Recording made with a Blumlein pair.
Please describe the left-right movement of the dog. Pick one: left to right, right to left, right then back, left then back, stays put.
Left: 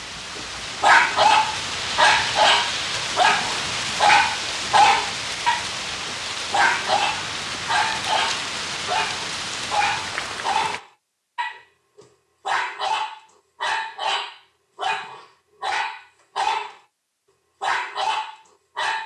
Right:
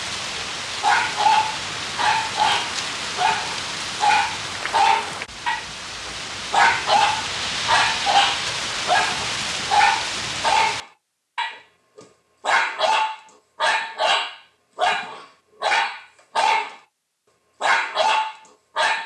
left to right.